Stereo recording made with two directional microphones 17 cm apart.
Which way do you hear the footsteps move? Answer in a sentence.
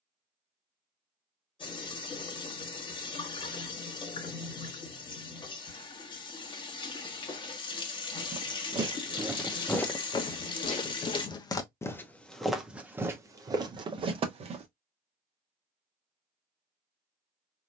In this clip you hear the footsteps go left and come back.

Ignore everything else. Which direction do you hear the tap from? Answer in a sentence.
In this clip you hear the tap on the left.